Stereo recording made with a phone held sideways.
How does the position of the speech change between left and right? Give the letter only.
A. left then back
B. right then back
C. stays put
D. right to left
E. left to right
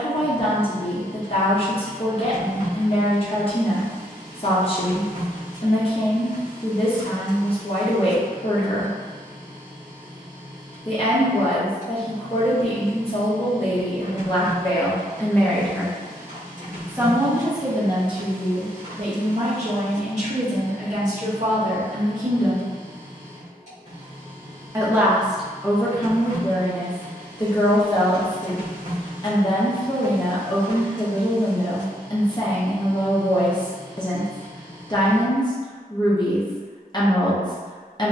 B.